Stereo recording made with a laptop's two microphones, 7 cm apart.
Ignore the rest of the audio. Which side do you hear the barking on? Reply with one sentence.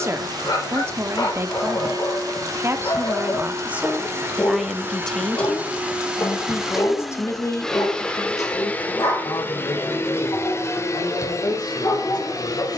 You can hear the barking on the left.